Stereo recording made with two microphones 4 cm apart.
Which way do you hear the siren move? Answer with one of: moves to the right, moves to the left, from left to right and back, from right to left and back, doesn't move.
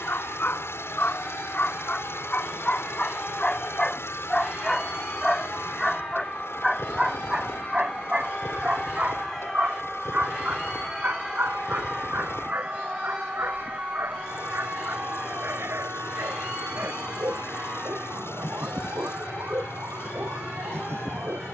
moves to the right.